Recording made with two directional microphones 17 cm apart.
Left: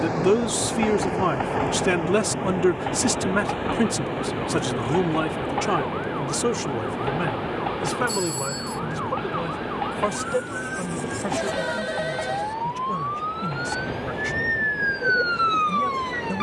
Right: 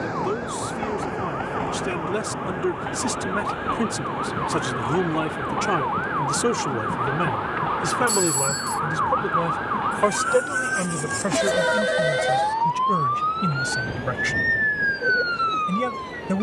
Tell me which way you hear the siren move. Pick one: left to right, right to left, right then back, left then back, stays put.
right to left.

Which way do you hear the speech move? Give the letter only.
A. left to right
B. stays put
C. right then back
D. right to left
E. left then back
A.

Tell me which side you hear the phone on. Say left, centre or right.
right.